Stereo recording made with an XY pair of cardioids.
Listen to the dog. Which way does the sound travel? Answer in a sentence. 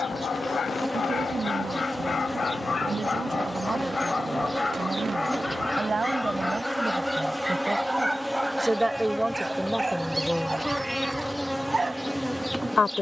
In this clip you hear the dog move to the right.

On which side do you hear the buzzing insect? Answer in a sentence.
You can hear the buzzing insect in the centre.